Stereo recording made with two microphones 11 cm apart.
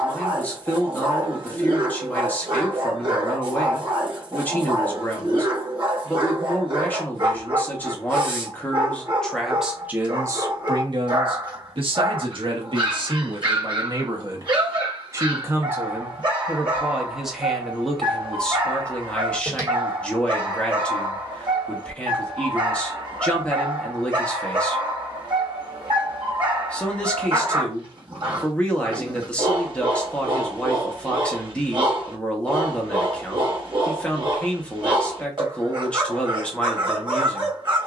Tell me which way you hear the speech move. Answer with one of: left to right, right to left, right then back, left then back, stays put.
right then back.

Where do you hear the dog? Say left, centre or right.
right.